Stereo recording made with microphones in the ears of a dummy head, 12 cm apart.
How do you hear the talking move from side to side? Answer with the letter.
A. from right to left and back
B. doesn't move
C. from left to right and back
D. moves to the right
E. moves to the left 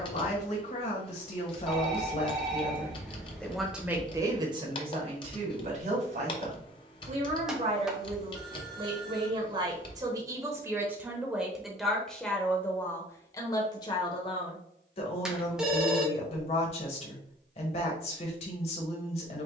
C.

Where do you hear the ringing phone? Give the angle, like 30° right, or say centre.
10° right.